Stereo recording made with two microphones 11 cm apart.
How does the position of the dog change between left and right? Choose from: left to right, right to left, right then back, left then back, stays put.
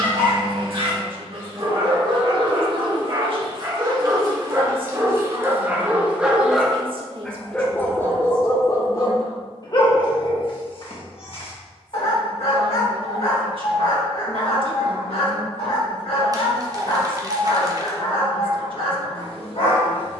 right to left.